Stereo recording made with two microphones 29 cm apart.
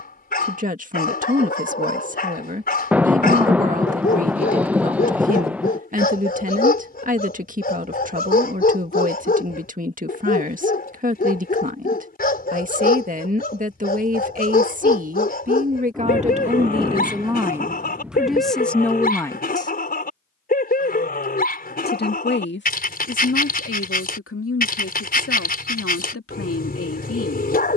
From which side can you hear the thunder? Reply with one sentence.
In this clip you hear the thunder in the centre.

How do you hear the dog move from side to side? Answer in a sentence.
You can hear the dog stay in one place.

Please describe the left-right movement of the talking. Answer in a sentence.
You can hear the talking move from right to left.